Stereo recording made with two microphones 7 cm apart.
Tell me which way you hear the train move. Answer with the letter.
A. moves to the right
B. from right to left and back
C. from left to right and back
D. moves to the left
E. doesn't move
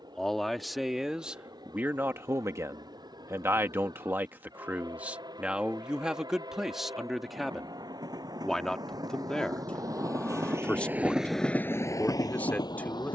D.